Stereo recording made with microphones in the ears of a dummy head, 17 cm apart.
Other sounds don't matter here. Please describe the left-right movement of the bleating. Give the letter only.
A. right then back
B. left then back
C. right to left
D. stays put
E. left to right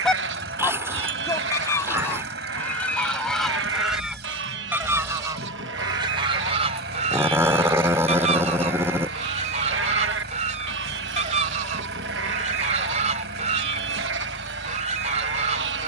D.